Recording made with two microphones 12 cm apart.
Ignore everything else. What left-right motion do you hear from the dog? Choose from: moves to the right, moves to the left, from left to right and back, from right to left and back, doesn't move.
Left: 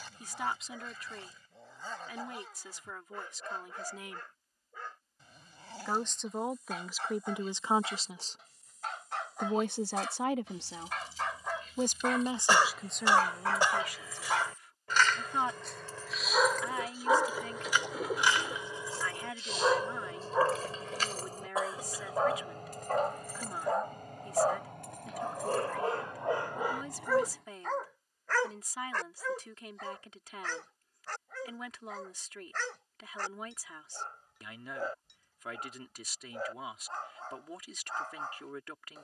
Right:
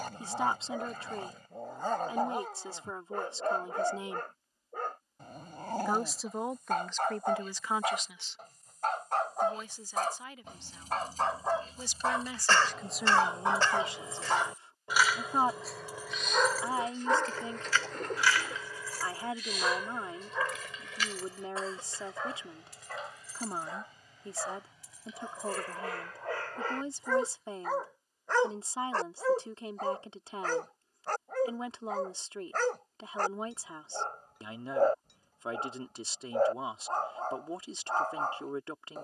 from right to left and back.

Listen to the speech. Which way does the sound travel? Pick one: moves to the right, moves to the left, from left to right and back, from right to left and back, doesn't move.
from right to left and back.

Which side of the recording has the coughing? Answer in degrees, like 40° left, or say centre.
10° left.